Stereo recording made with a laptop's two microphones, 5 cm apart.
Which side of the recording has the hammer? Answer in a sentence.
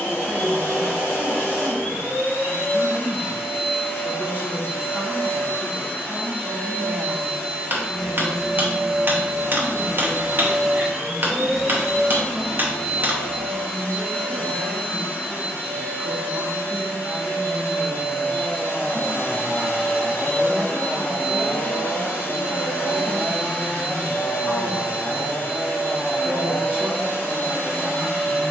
In this clip you hear the hammer on the right.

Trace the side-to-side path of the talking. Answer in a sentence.
You can hear the talking go left and come back.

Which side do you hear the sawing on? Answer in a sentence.
In this clip you hear the sawing on the left.